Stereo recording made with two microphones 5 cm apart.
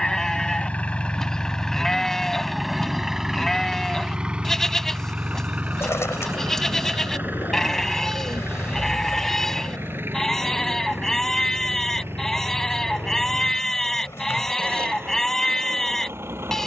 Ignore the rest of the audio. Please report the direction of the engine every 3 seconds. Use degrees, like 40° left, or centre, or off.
20° left, 20° right, 40° right, 50° right, 50° right, 50° right.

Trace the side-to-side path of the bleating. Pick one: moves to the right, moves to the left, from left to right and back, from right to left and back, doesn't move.
doesn't move.